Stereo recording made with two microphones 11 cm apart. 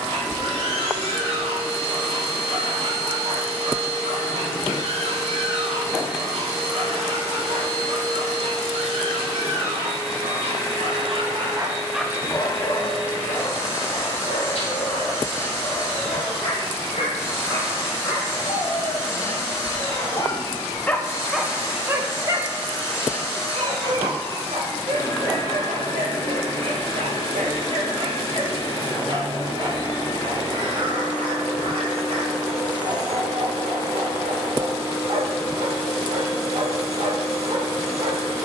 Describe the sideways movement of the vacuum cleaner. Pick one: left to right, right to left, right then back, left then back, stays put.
stays put.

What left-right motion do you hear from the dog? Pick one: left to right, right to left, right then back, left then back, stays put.
left then back.